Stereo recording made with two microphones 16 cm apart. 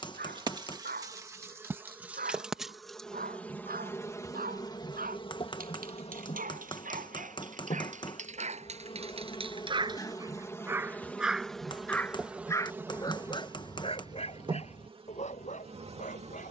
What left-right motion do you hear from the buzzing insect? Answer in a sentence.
In this clip you hear the buzzing insect go left and come back.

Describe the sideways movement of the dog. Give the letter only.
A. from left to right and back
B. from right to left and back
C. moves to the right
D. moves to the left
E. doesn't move
D.